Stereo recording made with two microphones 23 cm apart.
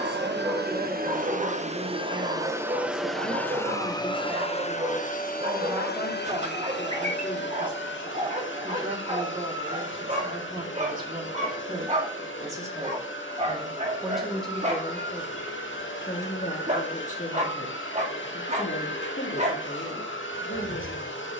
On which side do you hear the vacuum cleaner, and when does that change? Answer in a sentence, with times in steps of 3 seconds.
You can hear the vacuum cleaner on the right from 0 s and on the left from 3 s.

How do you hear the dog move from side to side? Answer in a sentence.
In this clip you hear the dog stay put.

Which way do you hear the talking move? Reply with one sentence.
In this clip you hear the talking move to the left.